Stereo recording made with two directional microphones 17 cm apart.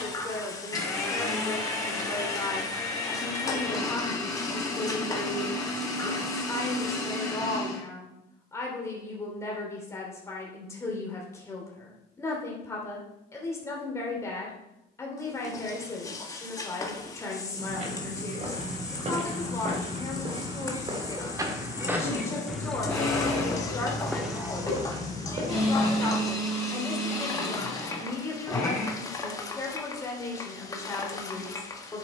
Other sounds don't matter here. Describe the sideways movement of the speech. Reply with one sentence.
In this clip you hear the speech stay put.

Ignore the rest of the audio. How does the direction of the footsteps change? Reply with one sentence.
In this clip you hear the footsteps go left and come back.